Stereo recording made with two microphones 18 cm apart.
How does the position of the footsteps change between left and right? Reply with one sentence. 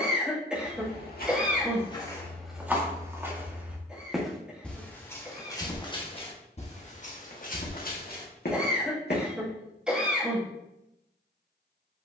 You can hear the footsteps move from left to right and back again.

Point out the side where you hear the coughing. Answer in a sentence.
In this clip you hear the coughing in the centre.